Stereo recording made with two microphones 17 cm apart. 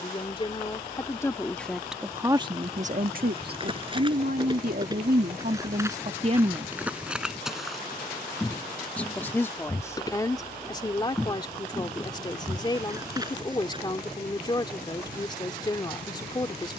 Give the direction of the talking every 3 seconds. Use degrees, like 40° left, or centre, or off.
centre, 60° right, 30° right, 20° left, 30° left, 30° left.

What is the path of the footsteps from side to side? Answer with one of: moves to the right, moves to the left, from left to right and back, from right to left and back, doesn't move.
from right to left and back.